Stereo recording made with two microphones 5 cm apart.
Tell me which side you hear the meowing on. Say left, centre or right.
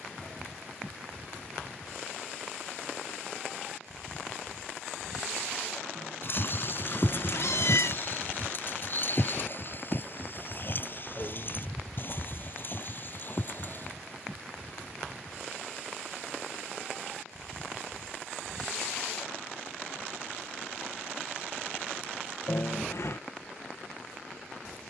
left.